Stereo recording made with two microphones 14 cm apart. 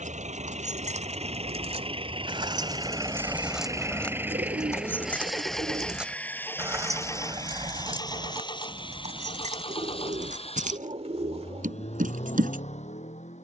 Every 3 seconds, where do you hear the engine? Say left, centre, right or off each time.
right, centre, left, left, left.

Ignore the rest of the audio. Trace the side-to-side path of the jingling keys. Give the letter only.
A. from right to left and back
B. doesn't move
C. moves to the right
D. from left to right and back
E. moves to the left
A.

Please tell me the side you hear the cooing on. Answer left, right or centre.
right.